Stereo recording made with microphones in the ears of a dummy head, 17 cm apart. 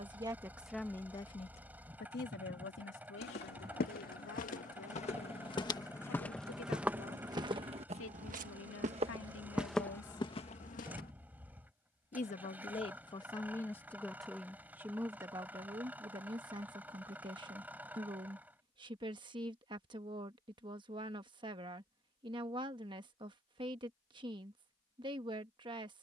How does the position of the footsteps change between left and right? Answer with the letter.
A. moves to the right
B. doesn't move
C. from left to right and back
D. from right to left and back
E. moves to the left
C.